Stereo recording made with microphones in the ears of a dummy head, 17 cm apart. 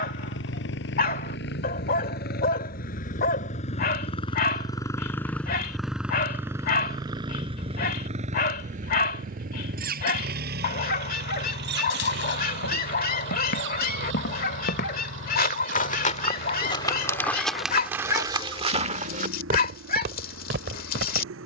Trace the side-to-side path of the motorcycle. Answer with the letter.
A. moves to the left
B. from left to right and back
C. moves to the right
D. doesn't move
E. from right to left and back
C.